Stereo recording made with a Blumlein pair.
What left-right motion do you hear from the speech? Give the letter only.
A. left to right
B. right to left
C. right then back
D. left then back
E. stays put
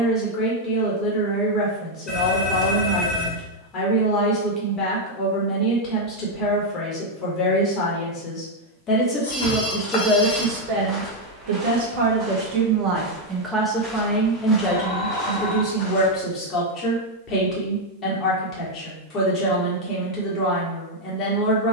C.